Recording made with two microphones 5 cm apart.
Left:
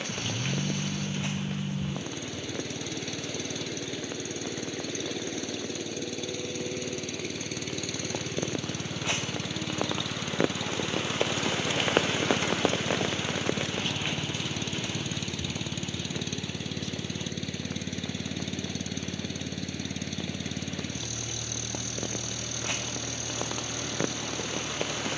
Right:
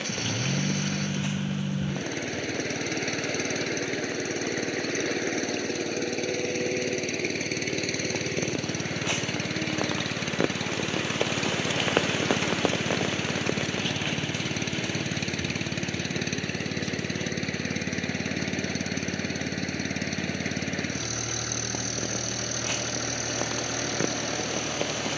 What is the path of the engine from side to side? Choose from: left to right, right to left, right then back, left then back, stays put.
stays put.